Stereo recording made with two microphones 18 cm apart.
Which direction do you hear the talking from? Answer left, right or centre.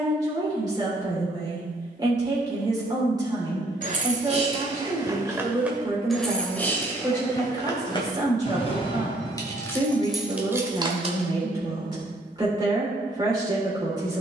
right.